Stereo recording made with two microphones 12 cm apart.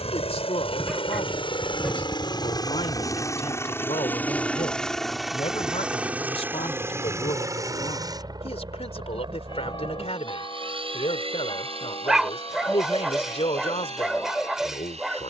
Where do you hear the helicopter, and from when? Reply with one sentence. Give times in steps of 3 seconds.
You can hear the helicopter on the left from 0 s, in the centre from 3 s and on the right from 6 s.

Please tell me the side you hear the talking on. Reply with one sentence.
In this clip you hear the talking on the left.